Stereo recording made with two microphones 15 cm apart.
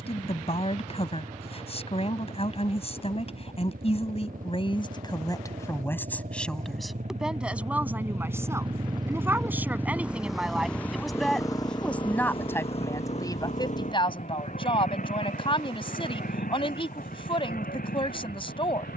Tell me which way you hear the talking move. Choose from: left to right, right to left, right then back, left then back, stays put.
right then back.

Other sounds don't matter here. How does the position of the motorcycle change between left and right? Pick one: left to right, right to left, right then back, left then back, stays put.
right to left.